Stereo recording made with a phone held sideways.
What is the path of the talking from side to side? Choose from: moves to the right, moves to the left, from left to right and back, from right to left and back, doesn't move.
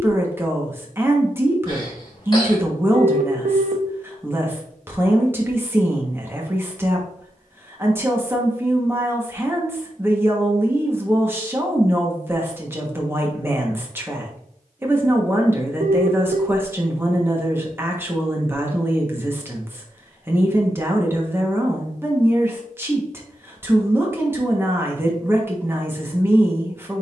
doesn't move.